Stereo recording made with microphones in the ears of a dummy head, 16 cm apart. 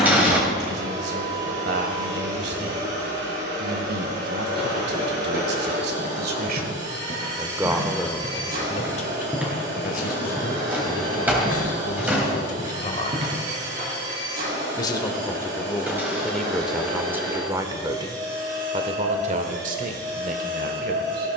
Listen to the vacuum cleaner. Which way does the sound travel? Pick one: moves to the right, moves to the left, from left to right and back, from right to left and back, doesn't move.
doesn't move.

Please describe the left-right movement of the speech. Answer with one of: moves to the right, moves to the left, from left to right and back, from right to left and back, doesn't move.
from right to left and back.